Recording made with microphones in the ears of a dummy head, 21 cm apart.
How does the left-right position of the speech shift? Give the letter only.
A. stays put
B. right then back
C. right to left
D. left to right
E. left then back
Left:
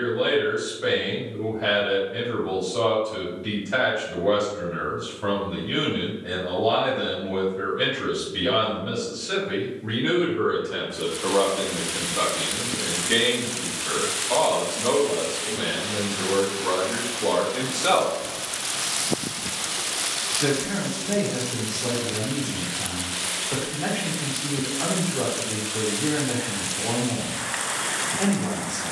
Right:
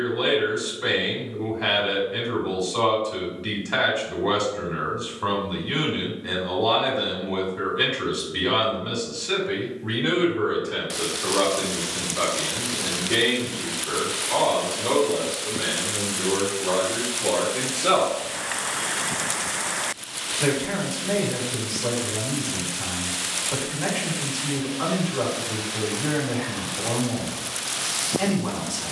E.